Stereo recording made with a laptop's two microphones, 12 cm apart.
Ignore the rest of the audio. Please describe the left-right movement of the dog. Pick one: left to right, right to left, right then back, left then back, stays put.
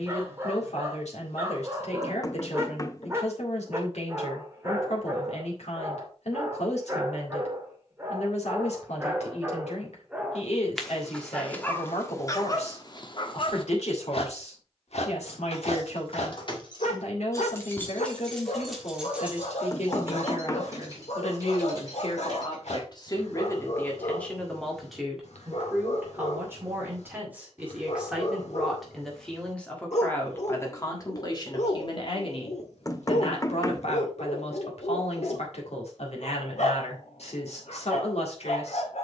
right to left.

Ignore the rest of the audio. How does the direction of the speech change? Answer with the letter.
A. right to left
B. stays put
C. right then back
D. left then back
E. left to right
C.